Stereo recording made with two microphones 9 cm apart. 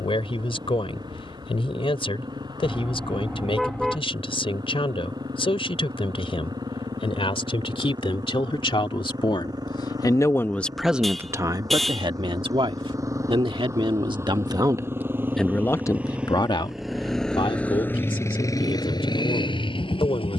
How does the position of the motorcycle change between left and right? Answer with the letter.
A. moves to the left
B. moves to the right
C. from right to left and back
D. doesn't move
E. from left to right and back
A.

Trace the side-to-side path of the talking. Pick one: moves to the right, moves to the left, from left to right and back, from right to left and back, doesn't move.
from left to right and back.